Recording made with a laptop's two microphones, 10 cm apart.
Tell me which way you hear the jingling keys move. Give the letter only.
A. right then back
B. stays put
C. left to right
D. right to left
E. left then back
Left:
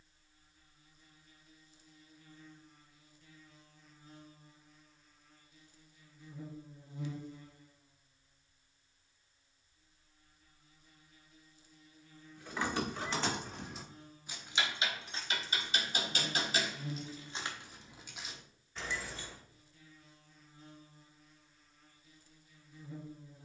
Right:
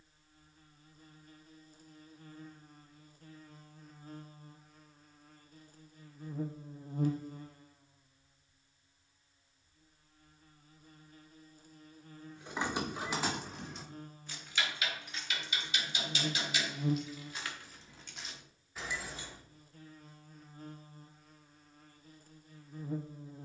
E.